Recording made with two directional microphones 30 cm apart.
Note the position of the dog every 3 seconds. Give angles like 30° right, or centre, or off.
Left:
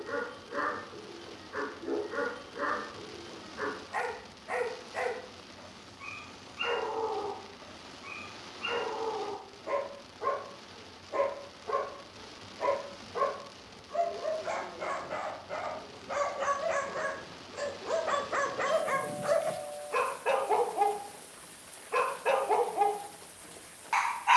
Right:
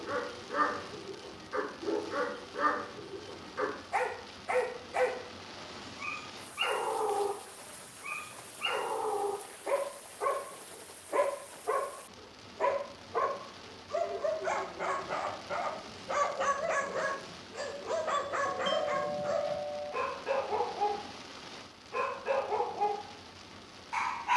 40° right, 40° right, 40° right, 40° right, 30° right, 10° right, 40° left, 50° left.